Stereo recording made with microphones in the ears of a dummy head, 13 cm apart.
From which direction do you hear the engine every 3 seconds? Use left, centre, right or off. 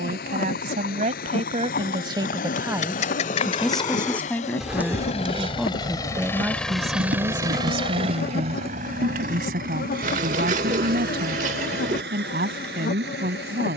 left, left, right, right, right.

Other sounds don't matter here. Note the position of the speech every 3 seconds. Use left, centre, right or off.
right, centre, right, right, right.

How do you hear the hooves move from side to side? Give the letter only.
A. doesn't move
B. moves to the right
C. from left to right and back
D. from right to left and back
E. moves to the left
B.